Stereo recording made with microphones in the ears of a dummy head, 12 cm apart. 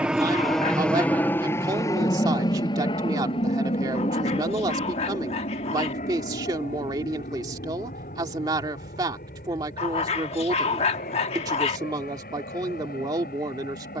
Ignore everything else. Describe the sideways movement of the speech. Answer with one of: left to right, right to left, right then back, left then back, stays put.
stays put.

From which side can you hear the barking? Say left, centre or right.
left.